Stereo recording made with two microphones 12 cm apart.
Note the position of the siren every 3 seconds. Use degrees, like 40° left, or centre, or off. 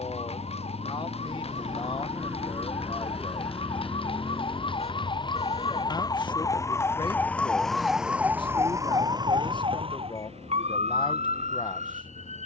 60° left, 50° left, 10° left, 60° right.